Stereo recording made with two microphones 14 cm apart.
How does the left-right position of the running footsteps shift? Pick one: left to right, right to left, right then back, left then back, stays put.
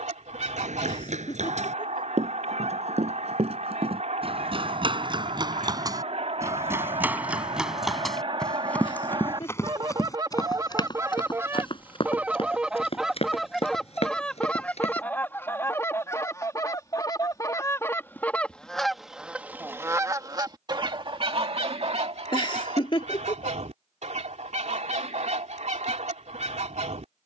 right to left.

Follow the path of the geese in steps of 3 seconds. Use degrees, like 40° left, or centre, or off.
60° right, 60° right, 50° right, 30° right, centre, 20° left, 10° right, 60° right, 60° right.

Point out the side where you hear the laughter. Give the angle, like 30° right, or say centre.
40° left.